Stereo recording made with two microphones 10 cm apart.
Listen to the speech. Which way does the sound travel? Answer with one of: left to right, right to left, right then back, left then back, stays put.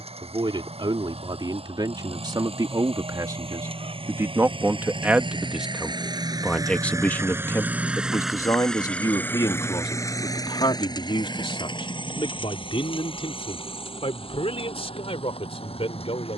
right to left.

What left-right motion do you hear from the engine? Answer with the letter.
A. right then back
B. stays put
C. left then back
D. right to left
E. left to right
D.